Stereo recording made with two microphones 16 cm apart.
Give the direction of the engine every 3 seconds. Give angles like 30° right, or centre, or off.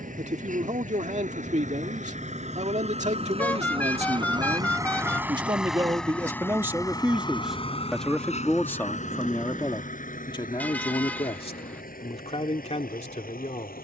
60° right, 30° right, 30° left, 60° left, 70° left.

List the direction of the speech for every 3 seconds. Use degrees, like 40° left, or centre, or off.
50° right, 40° right, centre, 30° left, 50° left.